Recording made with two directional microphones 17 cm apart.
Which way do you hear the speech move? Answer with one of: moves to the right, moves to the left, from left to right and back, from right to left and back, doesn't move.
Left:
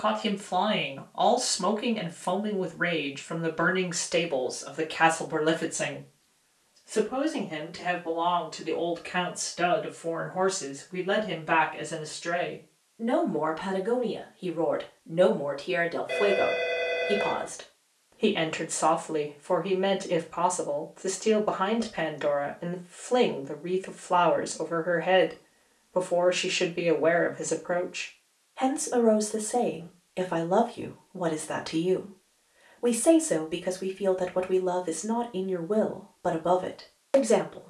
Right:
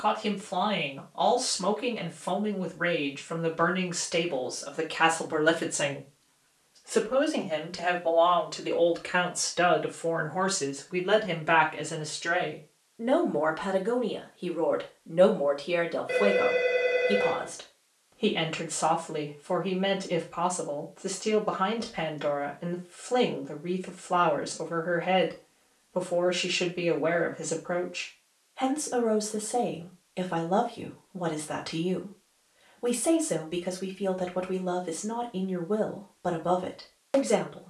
from left to right and back.